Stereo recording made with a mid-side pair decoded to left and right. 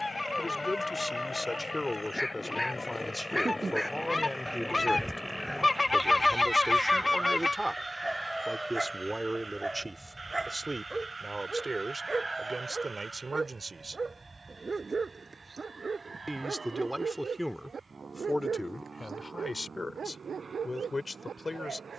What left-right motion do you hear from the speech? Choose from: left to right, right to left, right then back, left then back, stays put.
right then back.